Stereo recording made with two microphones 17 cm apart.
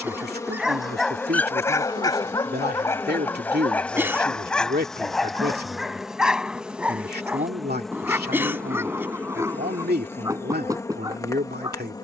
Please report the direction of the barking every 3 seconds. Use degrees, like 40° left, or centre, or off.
10° left, centre, 10° right, 20° right.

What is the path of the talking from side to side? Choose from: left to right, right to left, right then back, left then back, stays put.
stays put.